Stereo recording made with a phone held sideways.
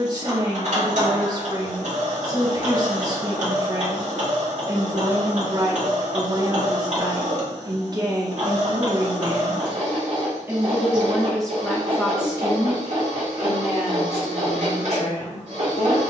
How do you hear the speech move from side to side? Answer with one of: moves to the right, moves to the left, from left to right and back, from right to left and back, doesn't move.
moves to the left.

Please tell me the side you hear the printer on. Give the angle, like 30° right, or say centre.
60° right.